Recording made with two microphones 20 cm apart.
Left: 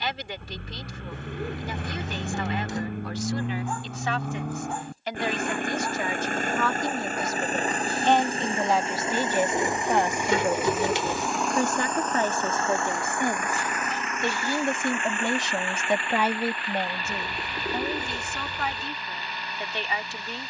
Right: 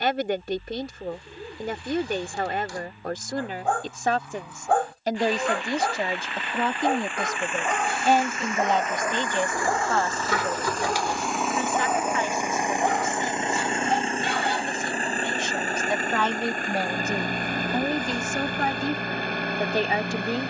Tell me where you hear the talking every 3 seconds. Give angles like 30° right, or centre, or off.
50° right, 40° right, 10° right, 30° left, 50° left, 10° left, 40° right.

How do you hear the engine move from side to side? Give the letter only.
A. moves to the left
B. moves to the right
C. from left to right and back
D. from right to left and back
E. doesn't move
B.